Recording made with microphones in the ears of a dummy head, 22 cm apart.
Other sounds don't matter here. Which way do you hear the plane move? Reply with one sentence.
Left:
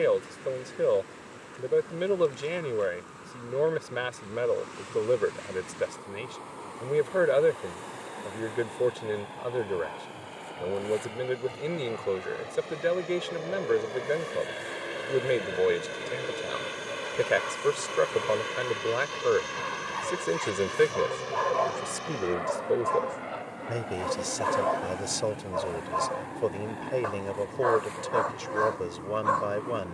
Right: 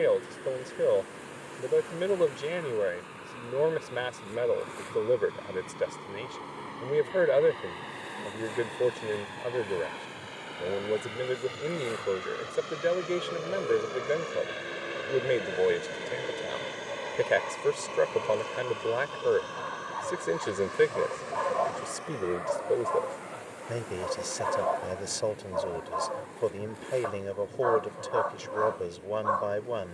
In this clip you hear the plane move to the left.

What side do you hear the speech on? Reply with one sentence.
In this clip you hear the speech in the centre.